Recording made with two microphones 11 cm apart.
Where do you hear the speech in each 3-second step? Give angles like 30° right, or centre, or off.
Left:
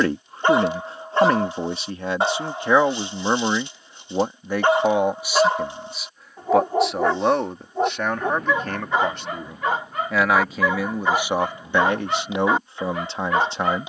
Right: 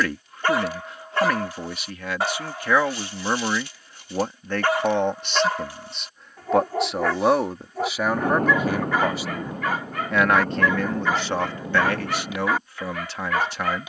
30° left, 10° left, centre, 10° left, 30° left.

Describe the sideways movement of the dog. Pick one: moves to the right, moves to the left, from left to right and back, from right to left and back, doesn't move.
doesn't move.